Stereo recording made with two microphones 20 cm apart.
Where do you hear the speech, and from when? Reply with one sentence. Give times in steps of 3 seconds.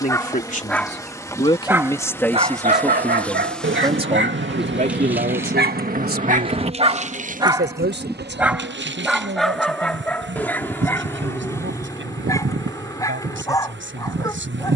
In this clip you hear the speech on the left from 0 s and on the right from 3 s.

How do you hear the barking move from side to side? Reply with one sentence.
In this clip you hear the barking move from left to right and back again.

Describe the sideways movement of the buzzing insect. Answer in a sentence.
You can hear the buzzing insect travel towards the right.